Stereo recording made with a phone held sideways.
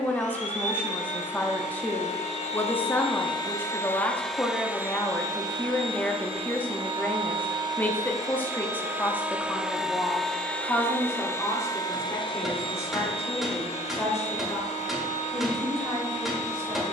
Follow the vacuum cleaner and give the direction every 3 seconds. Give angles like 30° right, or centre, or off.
60° left, centre, 30° right, 10° left, 50° left, 60° left.